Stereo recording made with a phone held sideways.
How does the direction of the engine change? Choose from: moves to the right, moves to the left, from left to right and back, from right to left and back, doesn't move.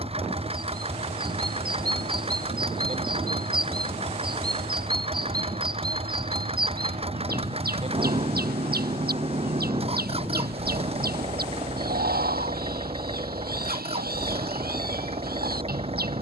doesn't move.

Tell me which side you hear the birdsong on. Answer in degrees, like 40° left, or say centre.
60° right.